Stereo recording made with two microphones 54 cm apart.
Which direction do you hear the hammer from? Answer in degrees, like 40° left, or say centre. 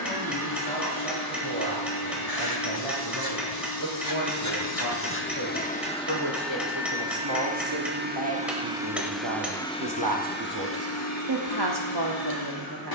centre.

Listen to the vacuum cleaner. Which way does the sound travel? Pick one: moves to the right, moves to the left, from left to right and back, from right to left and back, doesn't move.
from left to right and back.